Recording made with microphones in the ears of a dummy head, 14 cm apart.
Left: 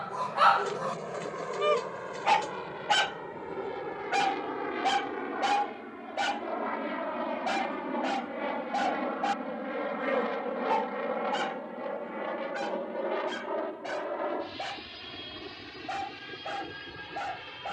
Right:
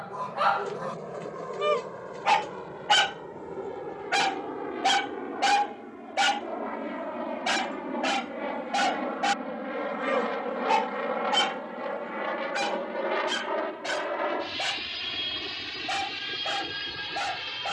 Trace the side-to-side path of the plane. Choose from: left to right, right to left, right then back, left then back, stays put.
left to right.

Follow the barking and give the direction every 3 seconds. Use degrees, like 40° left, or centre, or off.
10° left, 30° right, 50° right, 50° right, 60° right, 60° right.